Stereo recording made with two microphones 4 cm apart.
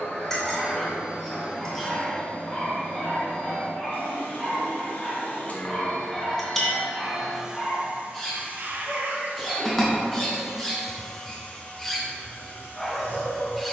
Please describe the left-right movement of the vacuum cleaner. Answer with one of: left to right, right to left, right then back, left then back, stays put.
right then back.